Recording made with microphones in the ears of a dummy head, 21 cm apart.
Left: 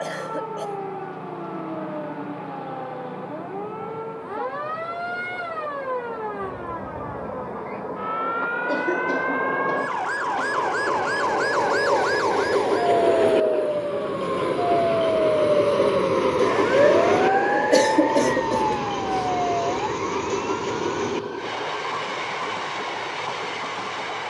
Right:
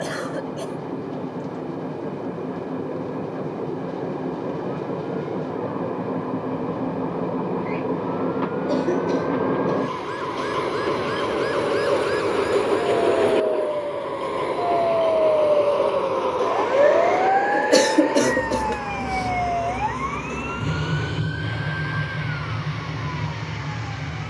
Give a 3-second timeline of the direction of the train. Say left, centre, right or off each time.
right, right, right, right, centre, left, left, left.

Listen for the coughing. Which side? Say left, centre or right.
centre.